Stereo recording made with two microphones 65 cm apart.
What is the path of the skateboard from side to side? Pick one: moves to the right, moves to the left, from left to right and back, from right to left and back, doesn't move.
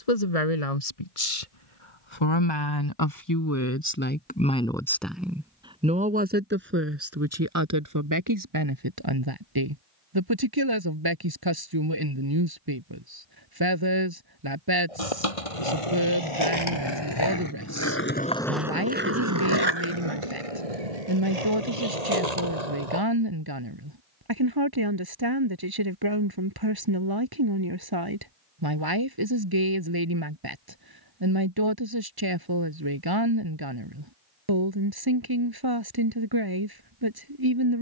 moves to the right.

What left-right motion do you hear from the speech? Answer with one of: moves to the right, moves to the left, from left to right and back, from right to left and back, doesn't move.
moves to the right.